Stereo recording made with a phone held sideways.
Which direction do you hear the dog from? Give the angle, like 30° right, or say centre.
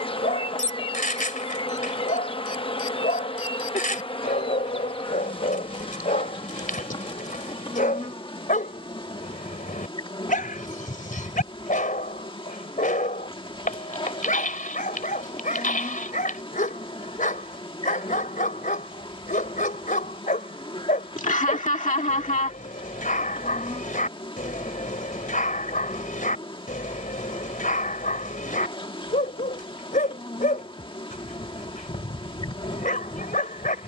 80° left.